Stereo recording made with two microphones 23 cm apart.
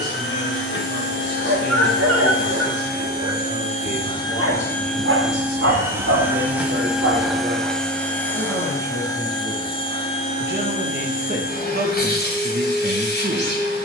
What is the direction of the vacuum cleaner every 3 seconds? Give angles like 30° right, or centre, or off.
60° left, 10° left, centre, 30° left, 50° left.